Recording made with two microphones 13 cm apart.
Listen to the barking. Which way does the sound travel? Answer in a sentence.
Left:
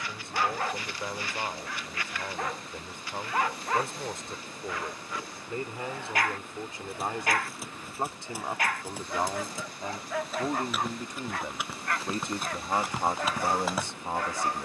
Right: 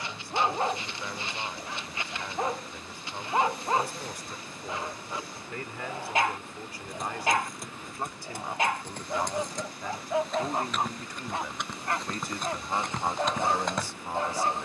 In this clip you hear the barking stay in one place.